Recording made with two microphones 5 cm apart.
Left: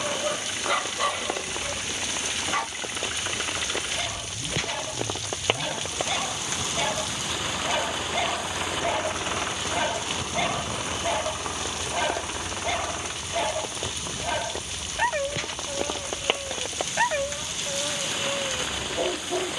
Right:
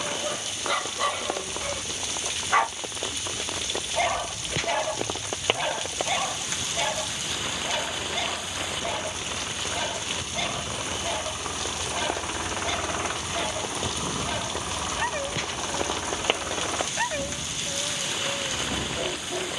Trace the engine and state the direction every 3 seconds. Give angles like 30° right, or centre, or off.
60° left, 60° left, 50° left, 20° left, 30° right, 60° right, 70° right.